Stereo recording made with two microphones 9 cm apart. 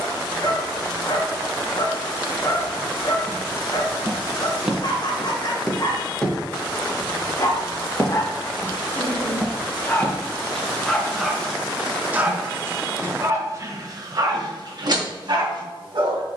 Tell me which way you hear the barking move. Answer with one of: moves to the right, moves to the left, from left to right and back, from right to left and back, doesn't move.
moves to the right.